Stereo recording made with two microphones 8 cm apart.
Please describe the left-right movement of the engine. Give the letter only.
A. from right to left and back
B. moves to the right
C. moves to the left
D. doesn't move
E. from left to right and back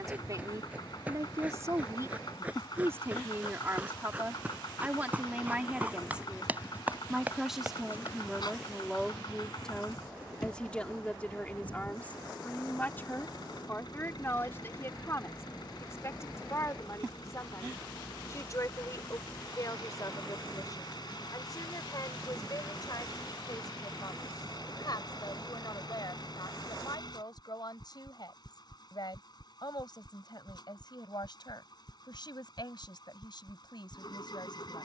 D.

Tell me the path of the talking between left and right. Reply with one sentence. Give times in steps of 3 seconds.
You can hear the talking on the right from 0 s, in the centre from 6 s and on the left from 12 s.